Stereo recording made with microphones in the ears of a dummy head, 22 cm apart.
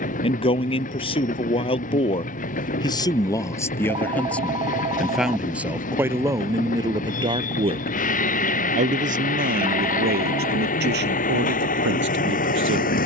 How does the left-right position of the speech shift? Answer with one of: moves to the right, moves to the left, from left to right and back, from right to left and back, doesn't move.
moves to the right.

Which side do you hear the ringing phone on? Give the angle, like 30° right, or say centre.
20° right.